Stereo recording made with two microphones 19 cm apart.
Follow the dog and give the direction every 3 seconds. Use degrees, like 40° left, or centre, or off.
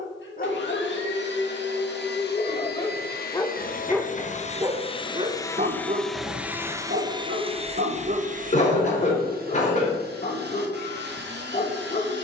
40° left, 20° right, 50° right, 40° left.